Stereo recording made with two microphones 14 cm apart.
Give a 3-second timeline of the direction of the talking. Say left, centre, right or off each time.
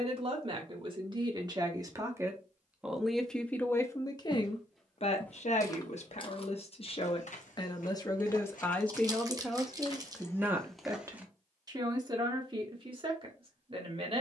right, left, left, centre, right.